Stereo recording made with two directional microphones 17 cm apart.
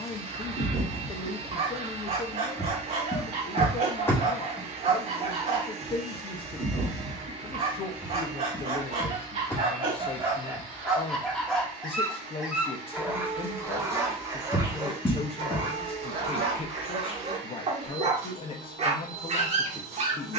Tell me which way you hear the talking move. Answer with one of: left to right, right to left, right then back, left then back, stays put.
stays put.